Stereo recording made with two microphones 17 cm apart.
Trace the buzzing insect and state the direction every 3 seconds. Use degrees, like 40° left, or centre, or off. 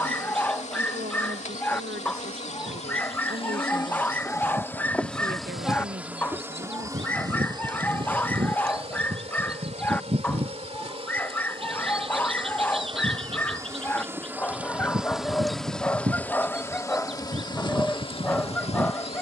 50° left, 20° left, 30° right, 40° right, 20° right, 10° left, 40° left.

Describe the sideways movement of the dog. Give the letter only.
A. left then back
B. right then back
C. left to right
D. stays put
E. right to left
D.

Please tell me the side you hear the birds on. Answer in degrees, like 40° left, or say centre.
40° right.